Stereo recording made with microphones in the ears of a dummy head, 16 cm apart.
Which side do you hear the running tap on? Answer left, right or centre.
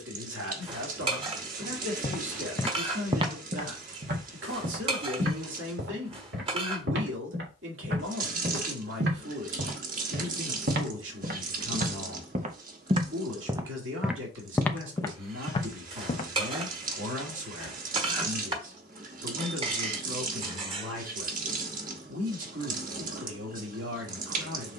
right.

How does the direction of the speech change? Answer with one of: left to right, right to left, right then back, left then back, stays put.
stays put.